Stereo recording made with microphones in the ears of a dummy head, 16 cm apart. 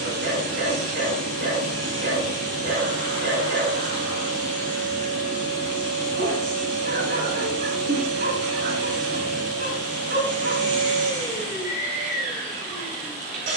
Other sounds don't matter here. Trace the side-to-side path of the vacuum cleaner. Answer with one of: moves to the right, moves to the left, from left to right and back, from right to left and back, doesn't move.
doesn't move.